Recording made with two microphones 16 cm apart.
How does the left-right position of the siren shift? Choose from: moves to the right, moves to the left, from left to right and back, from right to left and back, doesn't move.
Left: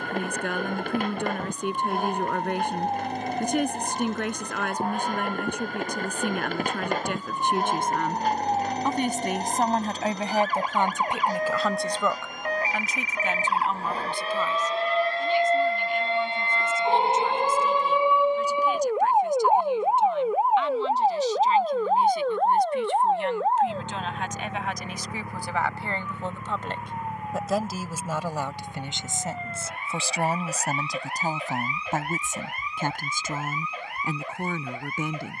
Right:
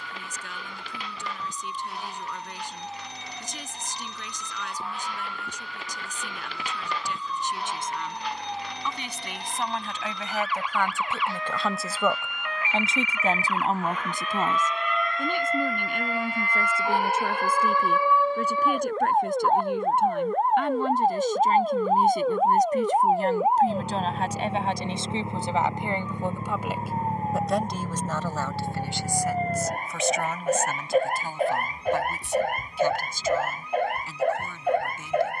moves to the right.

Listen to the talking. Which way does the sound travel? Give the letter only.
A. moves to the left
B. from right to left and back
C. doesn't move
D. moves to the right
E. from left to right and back
E.